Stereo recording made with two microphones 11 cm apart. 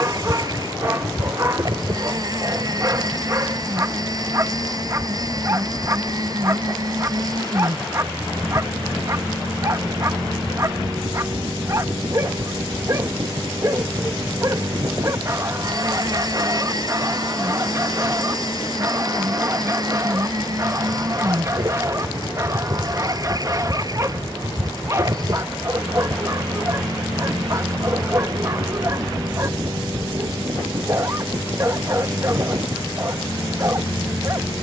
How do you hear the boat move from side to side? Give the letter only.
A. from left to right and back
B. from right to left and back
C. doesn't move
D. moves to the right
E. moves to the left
C.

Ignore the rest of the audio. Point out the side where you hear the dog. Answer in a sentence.
In this clip you hear the dog on the right.